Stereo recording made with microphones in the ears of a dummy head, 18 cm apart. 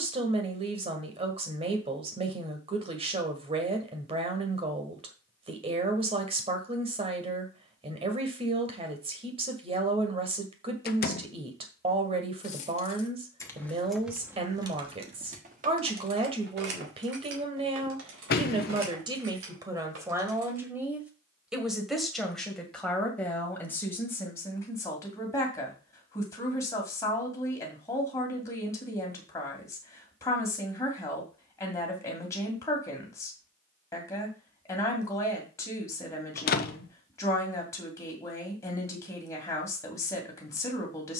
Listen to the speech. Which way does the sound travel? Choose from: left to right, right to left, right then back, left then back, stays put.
right to left.